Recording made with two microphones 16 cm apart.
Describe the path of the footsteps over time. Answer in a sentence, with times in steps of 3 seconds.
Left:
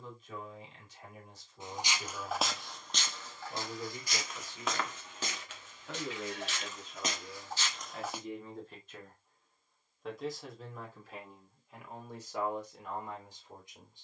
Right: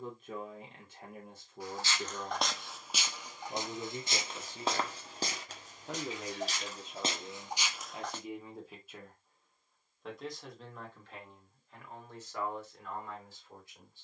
You can hear the footsteps in the centre from 0 s, on the right from 3 s and not at all from 9 s.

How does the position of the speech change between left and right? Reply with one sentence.
You can hear the speech go from the right side to the left.